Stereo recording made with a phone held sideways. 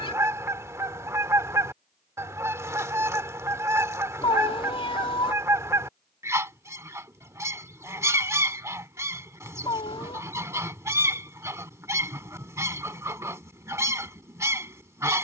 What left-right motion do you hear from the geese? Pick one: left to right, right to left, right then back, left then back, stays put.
stays put.